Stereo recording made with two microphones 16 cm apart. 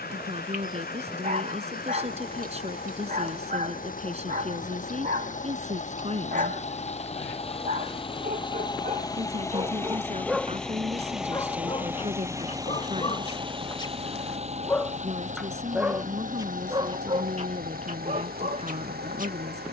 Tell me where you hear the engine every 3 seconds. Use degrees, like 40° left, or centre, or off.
60° left, 50° left, 40° left, 10° left, 30° right, 50° right, 60° right.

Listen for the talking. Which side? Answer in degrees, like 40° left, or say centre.
40° right.